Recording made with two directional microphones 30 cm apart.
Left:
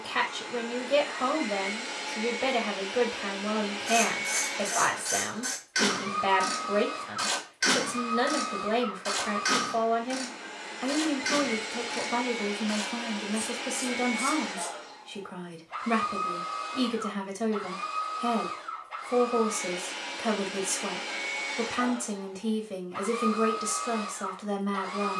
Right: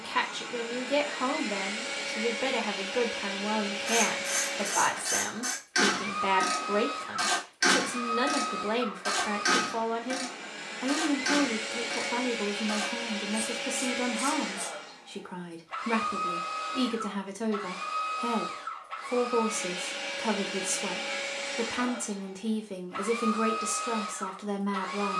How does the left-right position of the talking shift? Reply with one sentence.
In this clip you hear the talking stay in one place.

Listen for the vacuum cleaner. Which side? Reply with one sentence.
In this clip you hear the vacuum cleaner on the right.